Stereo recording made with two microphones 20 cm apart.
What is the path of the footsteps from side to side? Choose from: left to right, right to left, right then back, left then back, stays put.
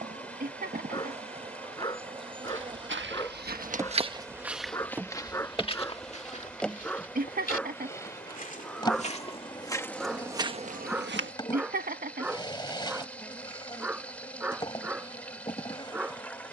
left then back.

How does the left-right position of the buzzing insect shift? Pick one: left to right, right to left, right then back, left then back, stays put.
right to left.